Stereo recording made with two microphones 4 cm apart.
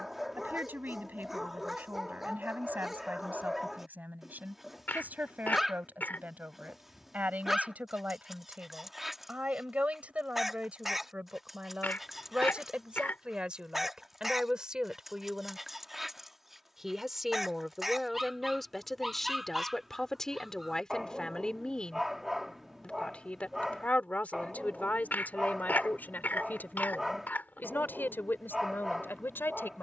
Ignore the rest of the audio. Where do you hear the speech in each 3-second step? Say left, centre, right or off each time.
right, right, right, right, right, centre, centre, left, left, left.